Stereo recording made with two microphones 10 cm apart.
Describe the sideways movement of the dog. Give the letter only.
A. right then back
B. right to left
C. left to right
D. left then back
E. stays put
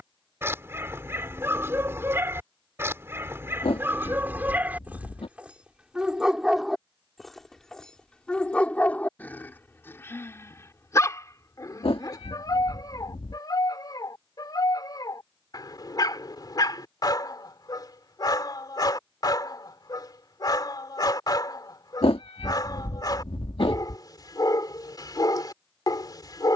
B.